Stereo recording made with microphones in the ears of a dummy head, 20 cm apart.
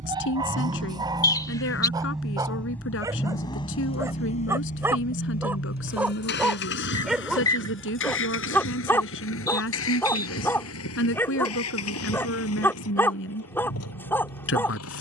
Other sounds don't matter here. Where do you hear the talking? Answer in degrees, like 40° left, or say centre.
60° left.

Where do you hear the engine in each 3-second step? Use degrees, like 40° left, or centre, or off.
10° right, 30° left, 60° left, 70° left, 70° left.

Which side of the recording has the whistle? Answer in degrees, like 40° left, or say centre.
20° left.